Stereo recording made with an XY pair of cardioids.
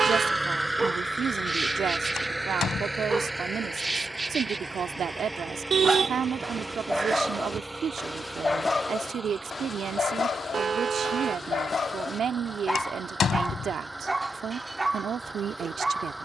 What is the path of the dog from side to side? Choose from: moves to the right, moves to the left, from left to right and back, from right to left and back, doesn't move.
from right to left and back.